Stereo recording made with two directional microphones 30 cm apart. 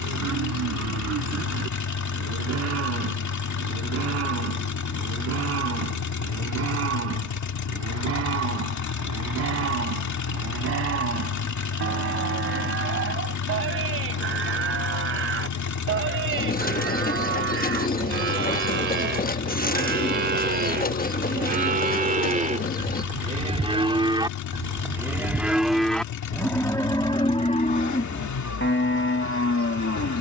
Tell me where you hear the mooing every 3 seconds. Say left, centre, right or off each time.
right, right, right, right, right, right, right, right, centre, left.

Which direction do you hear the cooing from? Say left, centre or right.
left.